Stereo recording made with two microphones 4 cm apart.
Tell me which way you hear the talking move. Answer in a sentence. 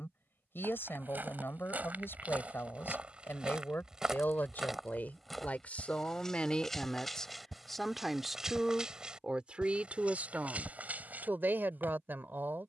In this clip you hear the talking move from left to right.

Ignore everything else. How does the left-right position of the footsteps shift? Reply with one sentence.
In this clip you hear the footsteps go left and come back.